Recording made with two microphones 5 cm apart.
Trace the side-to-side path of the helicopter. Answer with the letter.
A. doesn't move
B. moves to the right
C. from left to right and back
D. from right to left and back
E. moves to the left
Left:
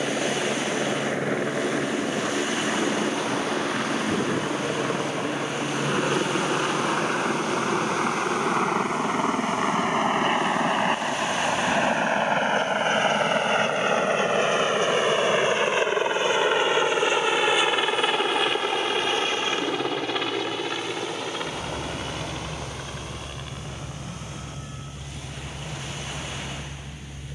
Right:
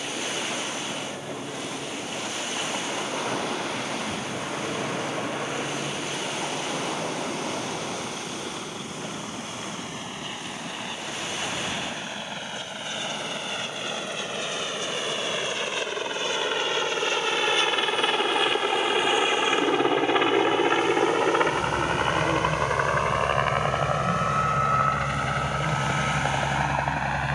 B.